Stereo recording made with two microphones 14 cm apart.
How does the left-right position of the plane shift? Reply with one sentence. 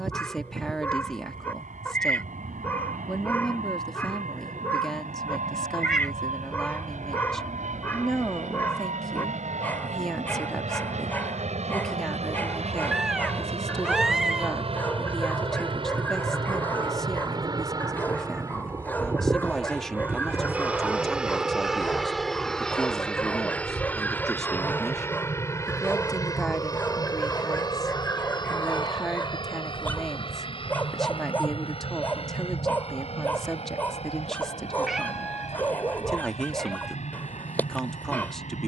In this clip you hear the plane travel towards the left.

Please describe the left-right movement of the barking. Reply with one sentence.
You can hear the barking stay in one place.